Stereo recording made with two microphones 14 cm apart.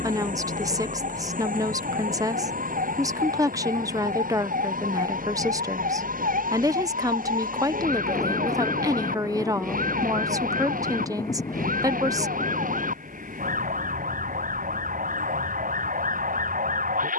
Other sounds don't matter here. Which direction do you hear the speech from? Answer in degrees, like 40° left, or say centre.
30° right.